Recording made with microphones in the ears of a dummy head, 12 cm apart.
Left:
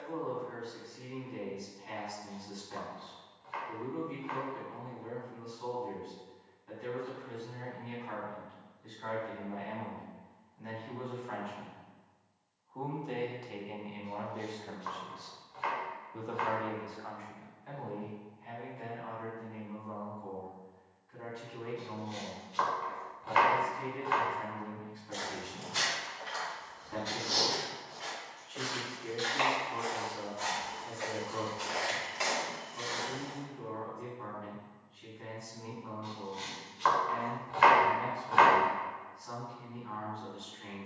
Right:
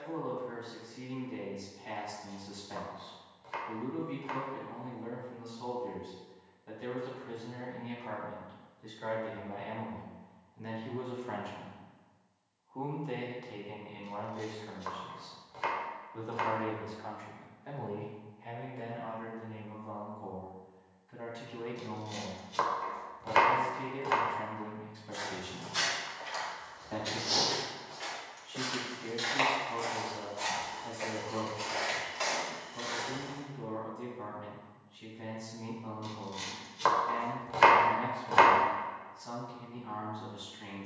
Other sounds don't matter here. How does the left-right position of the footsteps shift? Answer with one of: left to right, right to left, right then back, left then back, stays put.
right then back.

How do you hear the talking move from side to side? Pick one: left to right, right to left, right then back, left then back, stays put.
left then back.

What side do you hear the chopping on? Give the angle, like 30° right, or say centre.
50° right.